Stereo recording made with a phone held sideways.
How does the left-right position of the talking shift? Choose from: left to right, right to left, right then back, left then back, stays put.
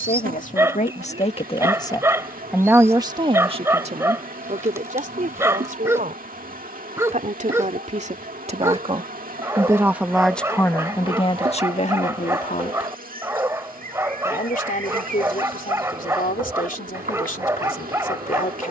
right then back.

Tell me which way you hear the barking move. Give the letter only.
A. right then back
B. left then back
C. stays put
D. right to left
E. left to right
C.